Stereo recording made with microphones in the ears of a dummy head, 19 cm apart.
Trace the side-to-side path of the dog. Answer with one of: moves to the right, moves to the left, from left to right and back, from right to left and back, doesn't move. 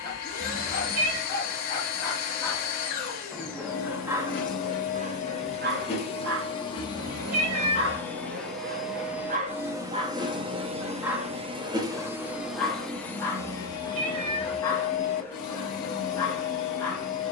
from left to right and back.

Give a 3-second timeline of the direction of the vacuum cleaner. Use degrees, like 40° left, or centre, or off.
40° left, 40° left, 10° left, 20° right, 10° left, 40° left.